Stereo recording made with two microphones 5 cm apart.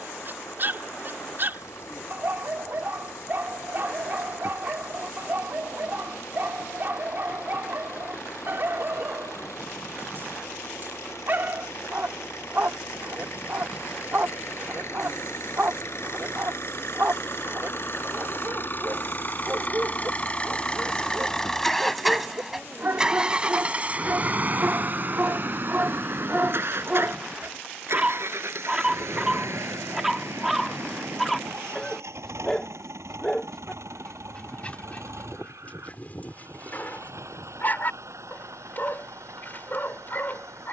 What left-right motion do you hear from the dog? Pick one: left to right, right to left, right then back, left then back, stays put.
right to left.